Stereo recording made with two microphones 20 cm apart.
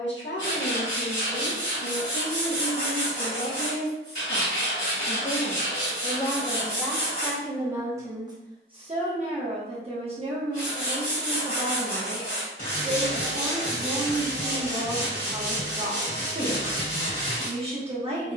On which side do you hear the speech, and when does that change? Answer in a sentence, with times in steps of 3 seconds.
You can hear the speech on the left from 0 s, in the centre from 6 s and on the right from 9 s.